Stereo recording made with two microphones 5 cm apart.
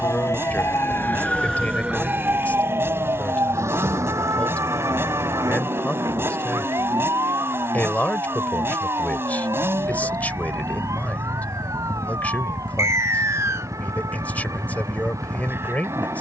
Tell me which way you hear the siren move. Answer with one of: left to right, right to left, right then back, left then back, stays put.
left to right.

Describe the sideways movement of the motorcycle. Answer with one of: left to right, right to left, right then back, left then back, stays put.
stays put.